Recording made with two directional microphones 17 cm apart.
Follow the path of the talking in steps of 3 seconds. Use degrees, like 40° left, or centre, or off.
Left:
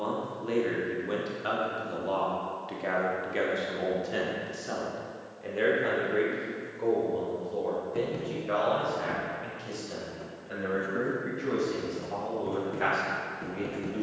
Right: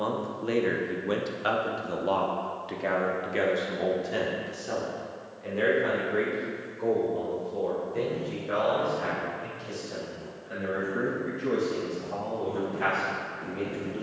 20° right, centre, 20° left, 20° left, 20° left.